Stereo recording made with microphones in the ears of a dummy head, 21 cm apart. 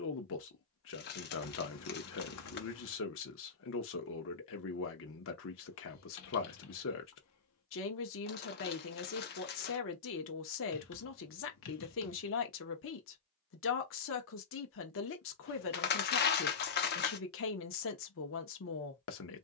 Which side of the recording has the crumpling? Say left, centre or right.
left.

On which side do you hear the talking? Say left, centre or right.
left.